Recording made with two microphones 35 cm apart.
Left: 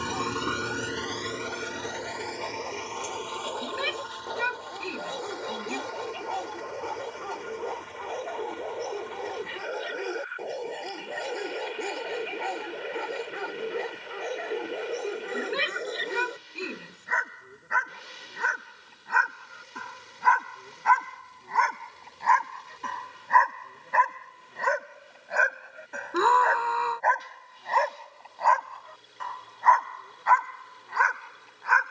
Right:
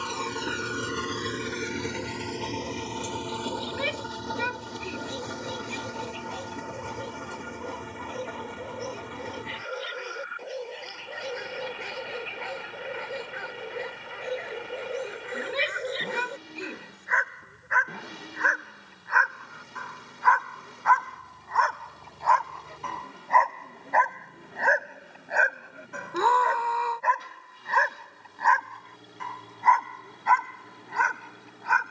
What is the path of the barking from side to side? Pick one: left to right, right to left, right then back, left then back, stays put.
left to right.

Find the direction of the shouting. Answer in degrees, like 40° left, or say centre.
20° left.